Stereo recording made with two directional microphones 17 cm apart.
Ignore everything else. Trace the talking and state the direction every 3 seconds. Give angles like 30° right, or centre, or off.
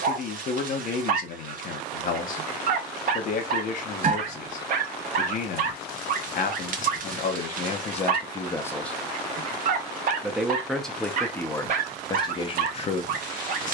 50° left, 50° left, 40° left, 10° left, 40° left.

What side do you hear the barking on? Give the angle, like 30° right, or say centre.
50° right.